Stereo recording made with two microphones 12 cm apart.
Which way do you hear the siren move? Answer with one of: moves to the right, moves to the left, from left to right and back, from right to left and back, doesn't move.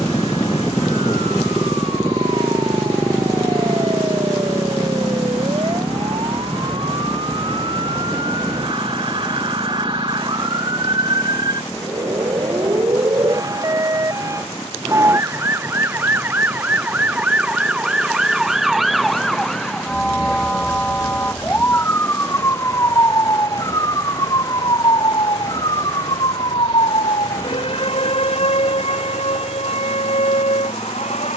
moves to the left.